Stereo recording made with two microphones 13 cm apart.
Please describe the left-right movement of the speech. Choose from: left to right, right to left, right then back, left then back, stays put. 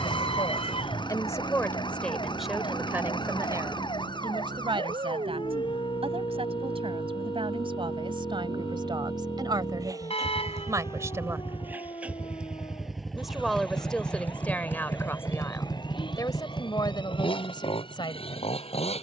right then back.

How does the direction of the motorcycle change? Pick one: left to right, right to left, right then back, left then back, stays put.
right to left.